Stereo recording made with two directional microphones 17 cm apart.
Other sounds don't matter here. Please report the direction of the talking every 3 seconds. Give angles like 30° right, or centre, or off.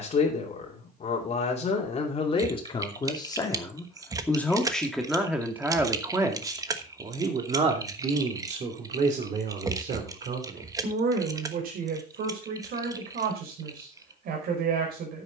40° left, 10° left, 30° right, 50° right, 60° right.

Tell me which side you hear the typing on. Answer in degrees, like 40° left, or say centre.
20° right.